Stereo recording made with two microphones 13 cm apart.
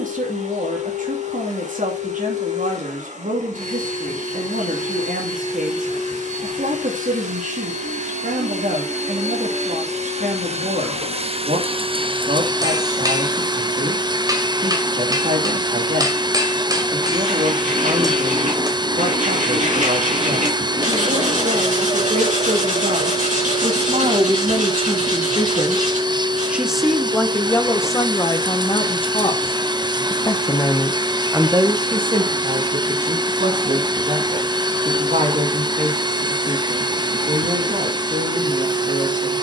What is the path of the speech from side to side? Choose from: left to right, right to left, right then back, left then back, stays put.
left then back.